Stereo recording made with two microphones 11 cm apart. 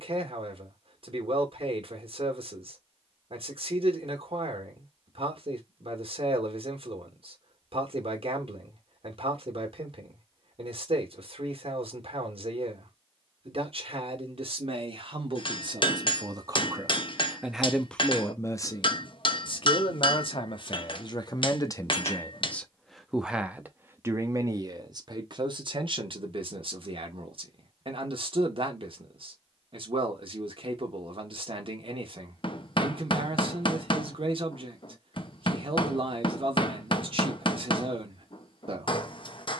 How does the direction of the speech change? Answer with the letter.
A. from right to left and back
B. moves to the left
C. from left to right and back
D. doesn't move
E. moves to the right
A.